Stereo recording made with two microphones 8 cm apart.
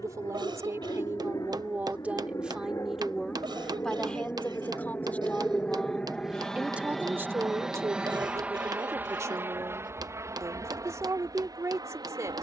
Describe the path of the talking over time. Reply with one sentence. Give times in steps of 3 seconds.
You can hear the talking on the right from 0 s, in the centre from 3 s and on the right from 6 s.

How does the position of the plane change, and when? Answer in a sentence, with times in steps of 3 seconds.
In this clip you hear the plane on the left from 0 s, in the centre from 6 s and on the right from 9 s.